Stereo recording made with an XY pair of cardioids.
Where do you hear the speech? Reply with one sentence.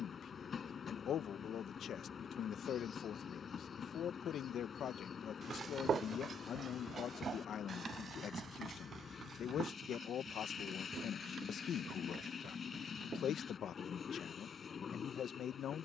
In this clip you hear the speech on the left.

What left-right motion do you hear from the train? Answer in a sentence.
You can hear the train stay put.